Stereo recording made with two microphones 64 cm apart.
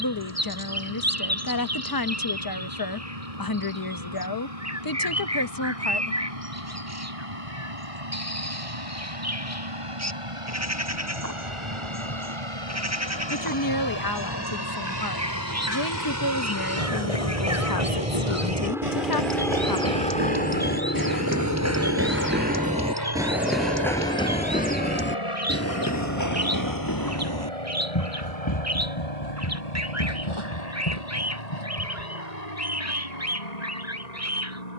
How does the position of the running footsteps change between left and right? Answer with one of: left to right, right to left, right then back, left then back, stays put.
right to left.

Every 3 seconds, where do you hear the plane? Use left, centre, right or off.
right, right, right, right, right, right, centre, left, left, left, left, left.